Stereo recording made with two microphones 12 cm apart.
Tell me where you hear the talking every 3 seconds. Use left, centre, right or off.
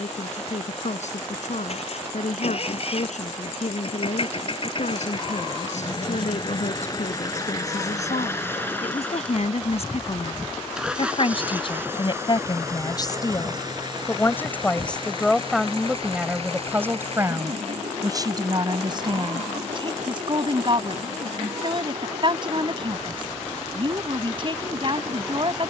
left, left, left, left, left, centre, right, right, right.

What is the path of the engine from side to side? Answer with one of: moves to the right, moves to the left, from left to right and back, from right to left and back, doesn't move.
moves to the right.